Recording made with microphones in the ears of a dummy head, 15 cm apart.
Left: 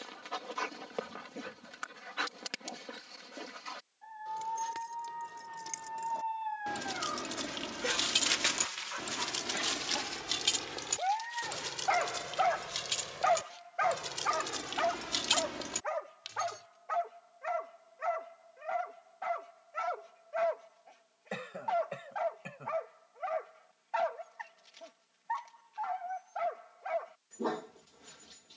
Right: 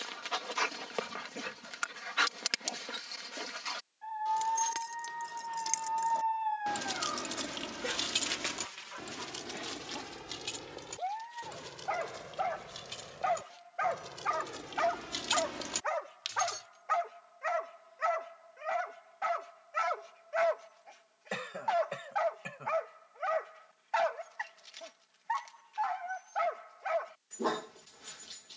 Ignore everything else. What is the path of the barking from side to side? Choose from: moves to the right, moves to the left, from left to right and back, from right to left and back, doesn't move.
from right to left and back.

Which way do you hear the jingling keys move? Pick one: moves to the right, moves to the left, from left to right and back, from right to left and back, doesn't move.
from right to left and back.